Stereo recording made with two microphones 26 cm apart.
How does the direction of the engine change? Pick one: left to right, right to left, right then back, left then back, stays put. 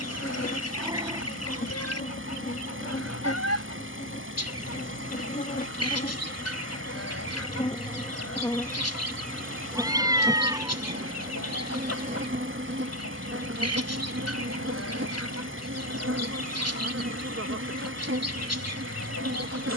stays put.